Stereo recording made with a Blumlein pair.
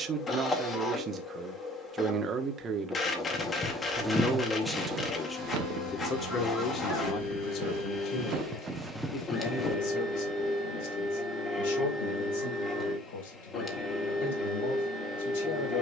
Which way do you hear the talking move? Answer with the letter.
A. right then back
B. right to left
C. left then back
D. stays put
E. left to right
B.